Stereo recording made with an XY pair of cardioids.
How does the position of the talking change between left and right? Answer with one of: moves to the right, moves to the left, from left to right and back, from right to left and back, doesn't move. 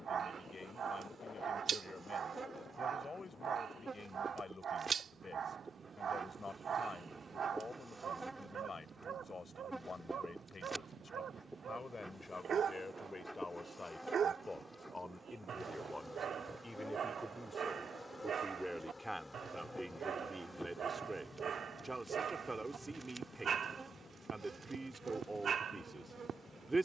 moves to the right.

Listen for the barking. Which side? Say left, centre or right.
right.